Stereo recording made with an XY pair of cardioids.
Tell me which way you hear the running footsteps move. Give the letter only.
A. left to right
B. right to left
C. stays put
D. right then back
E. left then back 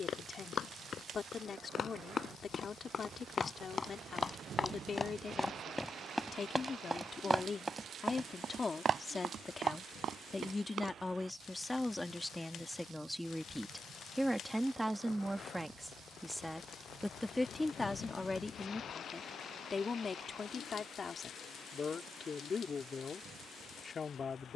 A.